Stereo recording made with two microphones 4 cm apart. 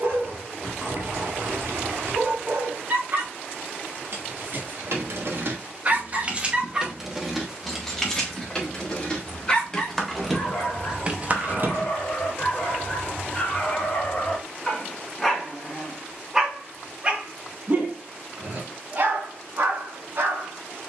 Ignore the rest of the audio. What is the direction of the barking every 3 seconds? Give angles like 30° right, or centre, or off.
70° right, 50° right, 10° right, 30° left, 30° left, 10° right, 60° right.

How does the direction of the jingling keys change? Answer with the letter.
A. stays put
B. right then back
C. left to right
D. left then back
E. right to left
D.